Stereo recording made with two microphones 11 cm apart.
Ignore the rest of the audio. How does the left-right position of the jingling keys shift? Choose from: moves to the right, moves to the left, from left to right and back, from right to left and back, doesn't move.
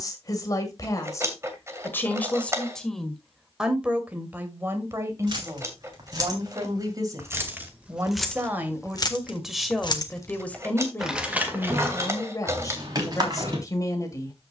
from right to left and back.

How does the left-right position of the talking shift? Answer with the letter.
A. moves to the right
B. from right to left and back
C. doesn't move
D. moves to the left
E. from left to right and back
E.